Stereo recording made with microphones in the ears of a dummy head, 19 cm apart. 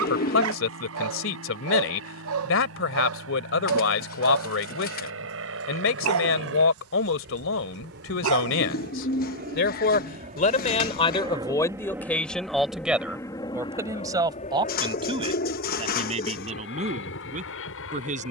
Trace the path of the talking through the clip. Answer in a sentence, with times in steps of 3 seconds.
In this clip you hear the talking on the left from 0 s, in the centre from 12 s and on the right from 15 s.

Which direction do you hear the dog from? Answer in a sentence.
In this clip you hear the dog on the right.